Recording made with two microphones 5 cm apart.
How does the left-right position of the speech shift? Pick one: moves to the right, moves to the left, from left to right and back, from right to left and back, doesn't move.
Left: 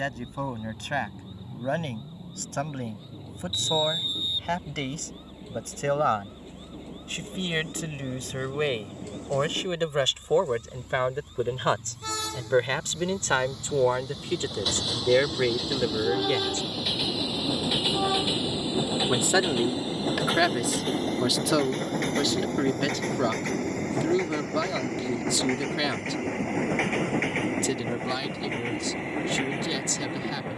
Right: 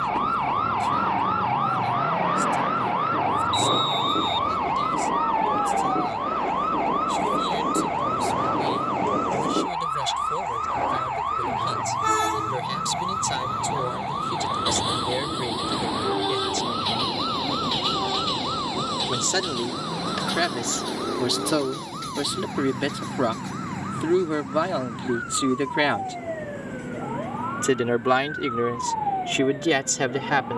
moves to the right.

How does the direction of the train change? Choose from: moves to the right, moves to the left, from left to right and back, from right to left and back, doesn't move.
moves to the left.